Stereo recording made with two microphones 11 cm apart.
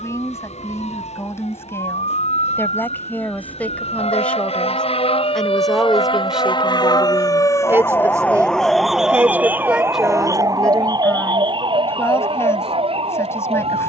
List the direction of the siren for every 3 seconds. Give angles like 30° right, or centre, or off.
80° left, 60° left, 30° left, 30° right, 50° right.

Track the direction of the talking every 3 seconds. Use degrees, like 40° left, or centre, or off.
20° left, 10° left, 20° right, centre, 20° left.